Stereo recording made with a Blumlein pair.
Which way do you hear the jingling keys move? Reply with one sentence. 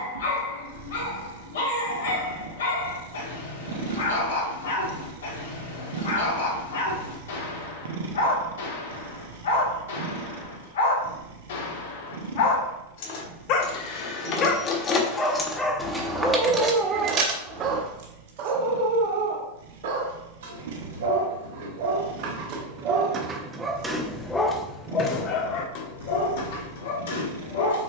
You can hear the jingling keys go from the left side to the right.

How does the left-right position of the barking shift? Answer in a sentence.
In this clip you hear the barking go right and come back.